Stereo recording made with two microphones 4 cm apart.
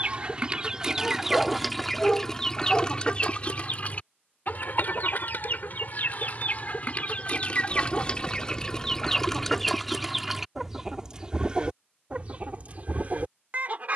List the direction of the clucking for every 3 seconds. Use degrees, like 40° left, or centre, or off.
centre, 40° left, 30° left, 10° right, 40° right.